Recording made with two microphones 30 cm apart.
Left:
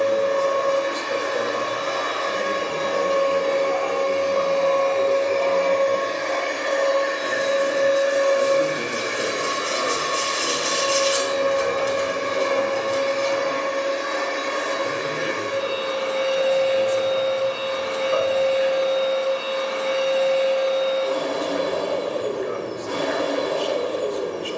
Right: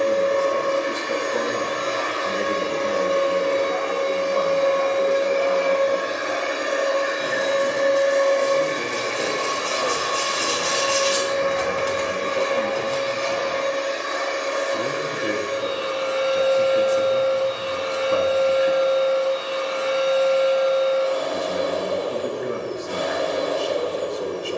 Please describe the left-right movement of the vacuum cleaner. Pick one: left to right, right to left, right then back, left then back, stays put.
right to left.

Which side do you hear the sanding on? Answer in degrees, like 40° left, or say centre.
70° right.